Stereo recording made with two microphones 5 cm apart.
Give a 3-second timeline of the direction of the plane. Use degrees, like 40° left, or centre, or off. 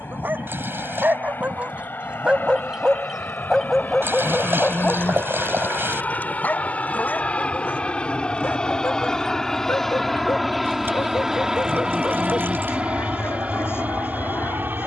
50° left, 40° left, 30° left, centre, 30° right.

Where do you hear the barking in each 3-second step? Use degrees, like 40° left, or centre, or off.
30° right, 10° left, 50° left, 60° left, 60° left.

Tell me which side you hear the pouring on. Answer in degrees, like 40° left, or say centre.
50° right.